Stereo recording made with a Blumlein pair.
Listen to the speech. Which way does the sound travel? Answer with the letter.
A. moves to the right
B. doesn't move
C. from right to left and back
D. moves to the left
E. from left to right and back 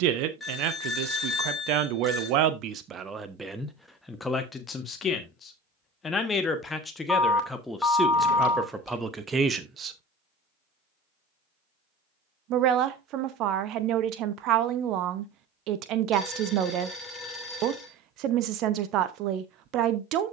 C.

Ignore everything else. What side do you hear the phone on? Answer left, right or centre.
centre.